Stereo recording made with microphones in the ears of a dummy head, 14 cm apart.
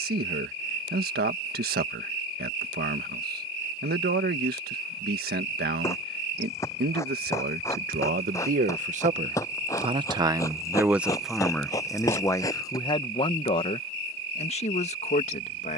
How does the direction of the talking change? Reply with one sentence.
You can hear the talking move to the left.